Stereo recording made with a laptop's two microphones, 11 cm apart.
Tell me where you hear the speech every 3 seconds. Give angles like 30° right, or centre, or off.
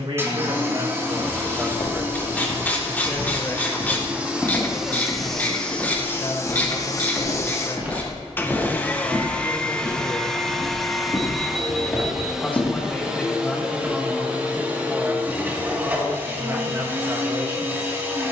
30° right, 30° left, 40° left, 30° left, centre, 30° right.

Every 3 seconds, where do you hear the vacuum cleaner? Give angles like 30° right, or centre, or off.
20° right, 10° right, 20° left, centre, 10° right, 20° right.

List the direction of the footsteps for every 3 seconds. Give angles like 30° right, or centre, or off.
40° left, 10° left, 10° right, 10° right, 30° left, off.